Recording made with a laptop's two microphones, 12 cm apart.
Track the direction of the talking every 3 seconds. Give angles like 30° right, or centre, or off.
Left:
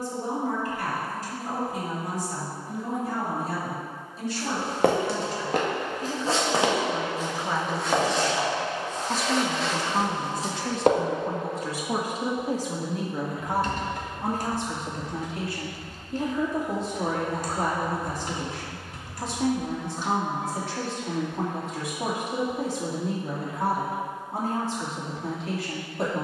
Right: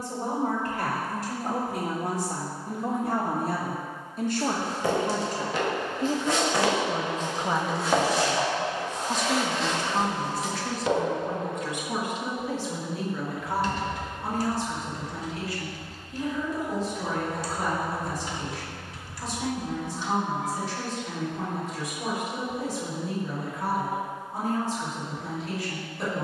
70° right, 50° right, 20° right, 20° left, 40° left, 60° left, 60° left, 60° left, 60° left.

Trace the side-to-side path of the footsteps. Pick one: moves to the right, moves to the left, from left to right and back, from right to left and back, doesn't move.
from left to right and back.